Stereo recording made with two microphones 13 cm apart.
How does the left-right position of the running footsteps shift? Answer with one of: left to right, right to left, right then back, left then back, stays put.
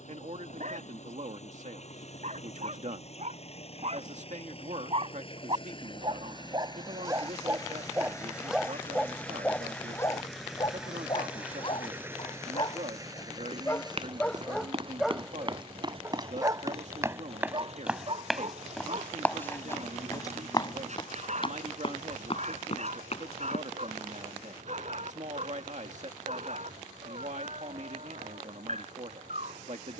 right to left.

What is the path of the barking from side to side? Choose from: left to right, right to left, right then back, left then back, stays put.
left then back.